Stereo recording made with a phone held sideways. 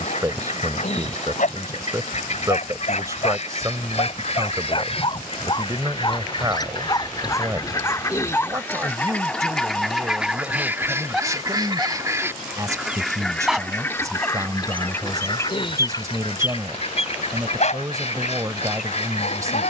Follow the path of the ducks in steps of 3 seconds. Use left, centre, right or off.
left, left, left, centre, centre, left, left.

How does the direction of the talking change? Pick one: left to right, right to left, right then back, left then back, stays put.
stays put.